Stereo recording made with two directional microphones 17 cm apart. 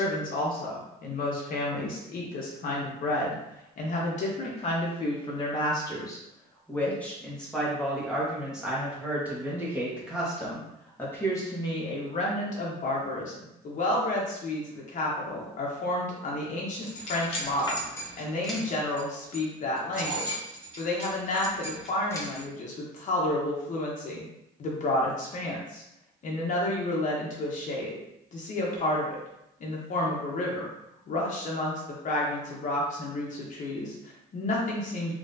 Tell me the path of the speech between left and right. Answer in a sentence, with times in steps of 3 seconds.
In this clip you hear the speech on the left from 0 s, in the centre from 6 s and on the left from 12 s.